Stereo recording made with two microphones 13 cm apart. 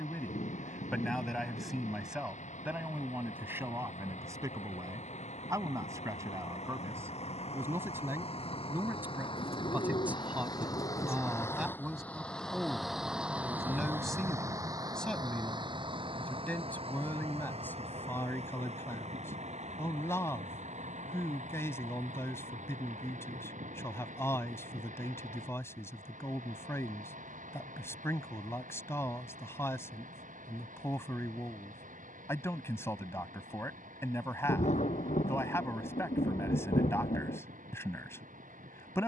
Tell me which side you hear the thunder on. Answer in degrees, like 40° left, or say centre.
60° left.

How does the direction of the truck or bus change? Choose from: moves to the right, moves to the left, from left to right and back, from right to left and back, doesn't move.
moves to the right.